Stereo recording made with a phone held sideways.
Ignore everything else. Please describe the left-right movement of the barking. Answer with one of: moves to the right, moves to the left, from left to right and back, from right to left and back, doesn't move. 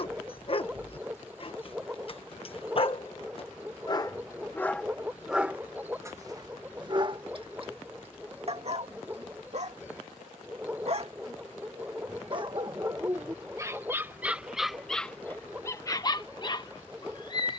from left to right and back.